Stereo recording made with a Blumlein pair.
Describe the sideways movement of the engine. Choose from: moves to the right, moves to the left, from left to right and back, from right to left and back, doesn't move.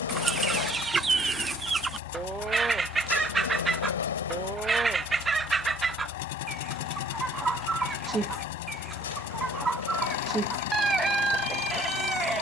doesn't move.